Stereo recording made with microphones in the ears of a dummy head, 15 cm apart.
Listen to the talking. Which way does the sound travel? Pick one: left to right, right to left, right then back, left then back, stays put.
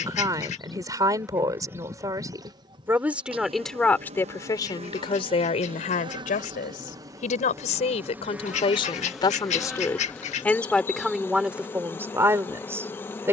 left then back.